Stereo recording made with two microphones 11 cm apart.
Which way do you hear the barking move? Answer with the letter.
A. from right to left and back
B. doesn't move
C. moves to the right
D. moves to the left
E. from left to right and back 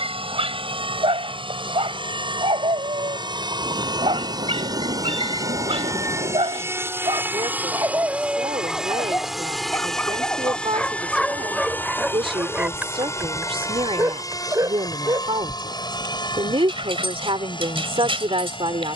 A.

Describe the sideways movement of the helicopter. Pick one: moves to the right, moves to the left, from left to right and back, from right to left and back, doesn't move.
moves to the left.